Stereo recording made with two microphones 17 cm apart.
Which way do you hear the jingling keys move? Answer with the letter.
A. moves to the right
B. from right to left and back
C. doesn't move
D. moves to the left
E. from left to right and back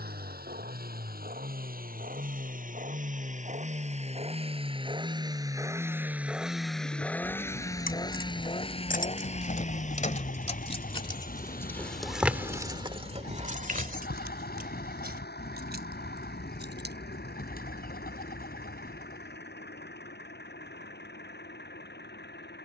A.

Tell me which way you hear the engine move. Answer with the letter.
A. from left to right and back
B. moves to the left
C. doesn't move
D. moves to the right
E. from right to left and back
B.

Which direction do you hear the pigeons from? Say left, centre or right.
left.